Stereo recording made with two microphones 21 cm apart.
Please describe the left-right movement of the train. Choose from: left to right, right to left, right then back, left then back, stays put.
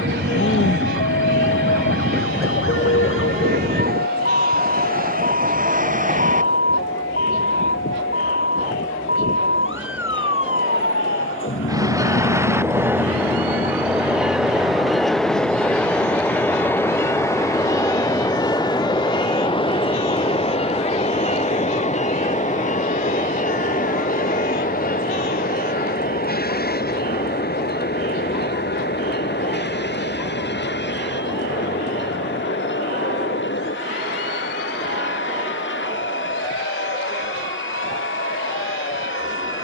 right to left.